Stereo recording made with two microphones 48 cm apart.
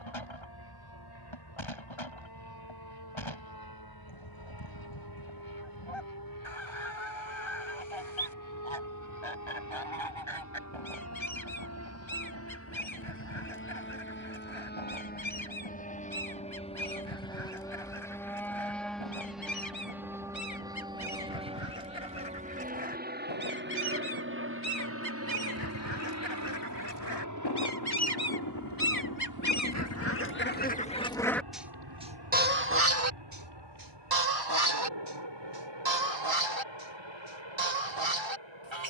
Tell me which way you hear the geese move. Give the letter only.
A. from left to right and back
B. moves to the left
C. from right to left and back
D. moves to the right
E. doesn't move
D.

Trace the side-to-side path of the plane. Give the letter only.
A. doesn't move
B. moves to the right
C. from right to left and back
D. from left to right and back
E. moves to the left
B.